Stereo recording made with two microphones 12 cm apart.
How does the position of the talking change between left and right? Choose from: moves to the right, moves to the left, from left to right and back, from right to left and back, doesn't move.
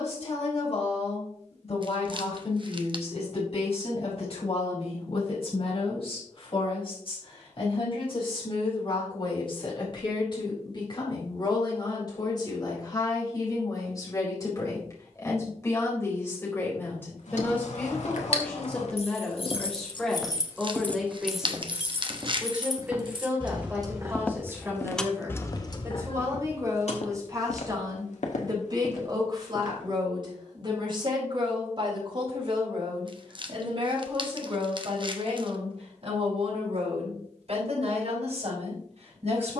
moves to the right.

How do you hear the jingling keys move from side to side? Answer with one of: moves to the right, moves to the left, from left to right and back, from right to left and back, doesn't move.
from left to right and back.